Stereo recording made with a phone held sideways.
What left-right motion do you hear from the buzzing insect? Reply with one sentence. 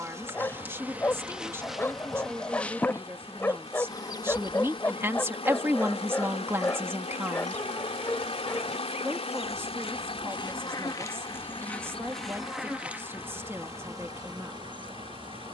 You can hear the buzzing insect move from right to left and back again.